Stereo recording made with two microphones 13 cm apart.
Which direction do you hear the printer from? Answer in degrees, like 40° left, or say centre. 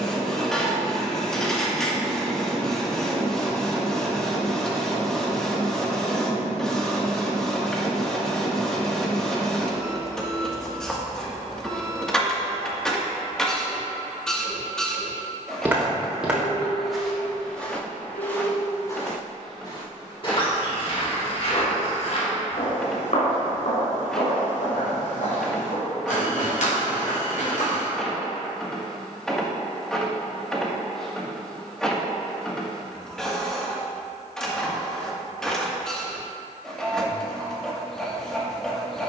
centre.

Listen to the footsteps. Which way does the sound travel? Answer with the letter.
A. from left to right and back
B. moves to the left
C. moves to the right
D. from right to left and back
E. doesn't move
B.